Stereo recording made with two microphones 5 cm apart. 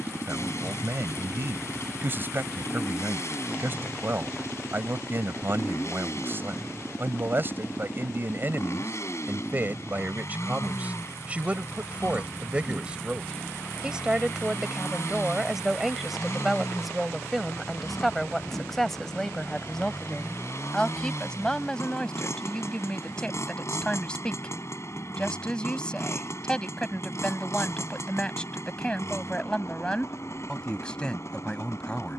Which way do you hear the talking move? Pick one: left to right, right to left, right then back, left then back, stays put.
right to left.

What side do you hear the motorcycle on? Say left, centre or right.
left.